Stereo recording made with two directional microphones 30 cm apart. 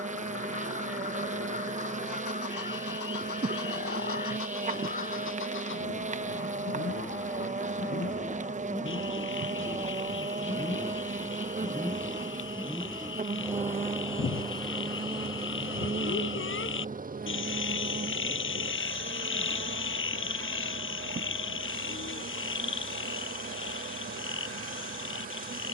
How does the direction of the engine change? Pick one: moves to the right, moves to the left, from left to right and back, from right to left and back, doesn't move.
moves to the right.